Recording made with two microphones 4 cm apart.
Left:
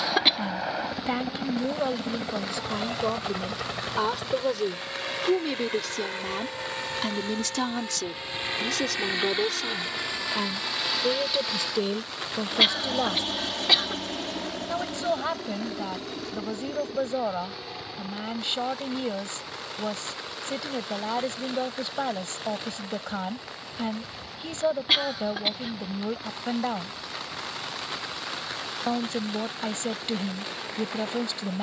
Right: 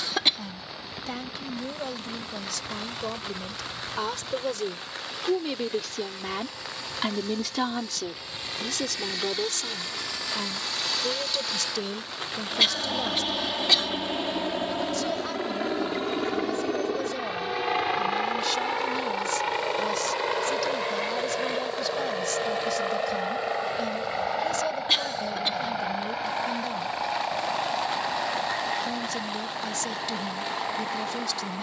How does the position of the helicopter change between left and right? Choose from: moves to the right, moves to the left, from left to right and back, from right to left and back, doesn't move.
moves to the right.